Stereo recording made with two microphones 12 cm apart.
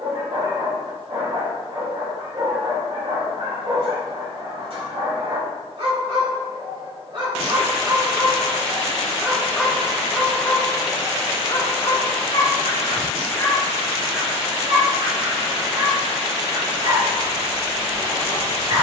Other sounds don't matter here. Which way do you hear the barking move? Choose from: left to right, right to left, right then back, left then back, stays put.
left then back.